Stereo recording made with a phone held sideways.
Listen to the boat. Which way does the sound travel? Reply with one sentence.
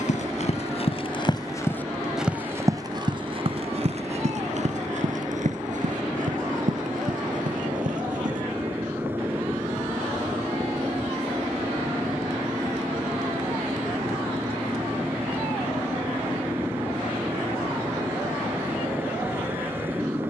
You can hear the boat stay put.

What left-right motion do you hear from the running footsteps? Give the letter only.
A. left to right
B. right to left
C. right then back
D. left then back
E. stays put
A.